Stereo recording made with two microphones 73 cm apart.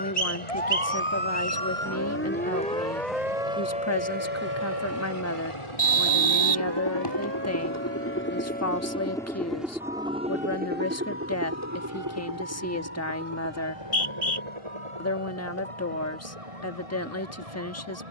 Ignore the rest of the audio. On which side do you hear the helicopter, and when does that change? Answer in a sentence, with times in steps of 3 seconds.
In this clip you hear the helicopter on the left from 0 s, in the centre from 9 s and on the right from 12 s.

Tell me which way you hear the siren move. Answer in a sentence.
You can hear the siren move from left to right.